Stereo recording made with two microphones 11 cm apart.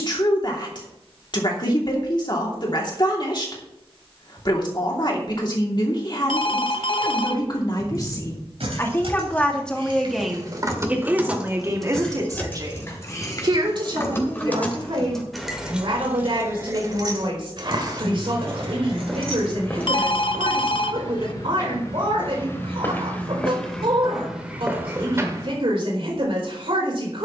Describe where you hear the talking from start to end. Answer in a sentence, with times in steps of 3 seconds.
In this clip you hear the talking on the left from 0 s, in the centre from 9 s and on the right from 12 s.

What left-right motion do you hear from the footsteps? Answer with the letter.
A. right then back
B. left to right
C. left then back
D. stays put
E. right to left
C.